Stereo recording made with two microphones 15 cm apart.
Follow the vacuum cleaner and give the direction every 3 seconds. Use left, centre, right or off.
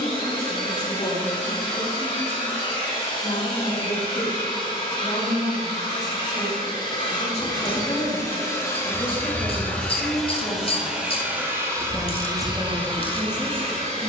left, left, left, centre, right.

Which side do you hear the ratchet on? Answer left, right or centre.
left.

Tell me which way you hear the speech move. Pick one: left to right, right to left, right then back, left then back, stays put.
left to right.